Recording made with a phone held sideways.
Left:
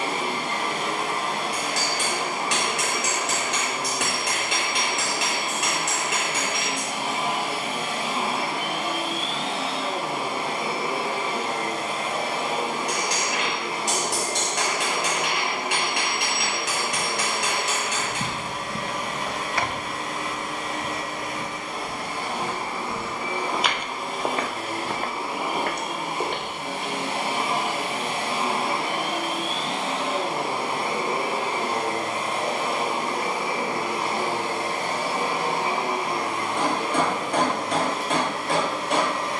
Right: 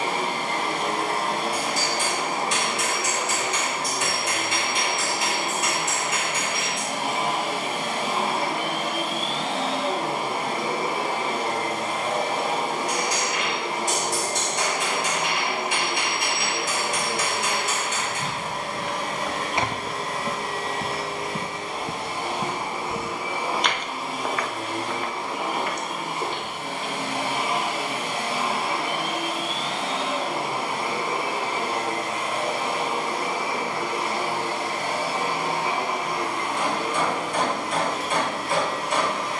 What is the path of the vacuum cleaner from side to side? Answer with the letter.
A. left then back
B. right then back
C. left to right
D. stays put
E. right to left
E.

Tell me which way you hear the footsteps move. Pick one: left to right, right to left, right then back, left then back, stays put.
right then back.